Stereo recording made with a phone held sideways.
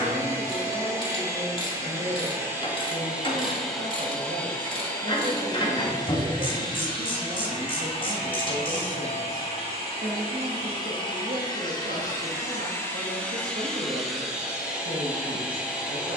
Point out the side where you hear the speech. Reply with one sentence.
You can hear the speech on the right.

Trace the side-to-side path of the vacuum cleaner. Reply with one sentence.
In this clip you hear the vacuum cleaner move from right to left and back again.